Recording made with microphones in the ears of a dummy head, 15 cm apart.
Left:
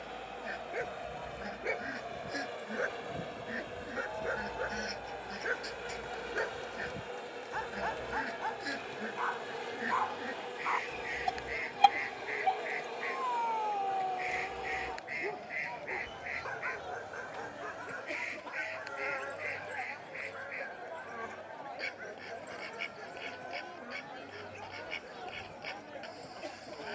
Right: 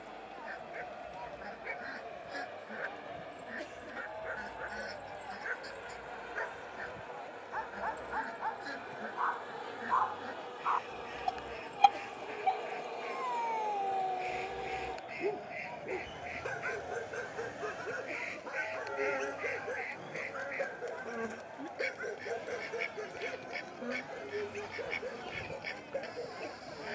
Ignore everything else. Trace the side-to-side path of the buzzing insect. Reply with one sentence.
You can hear the buzzing insect go from the left side to the right.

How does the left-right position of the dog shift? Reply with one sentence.
You can hear the dog move to the right.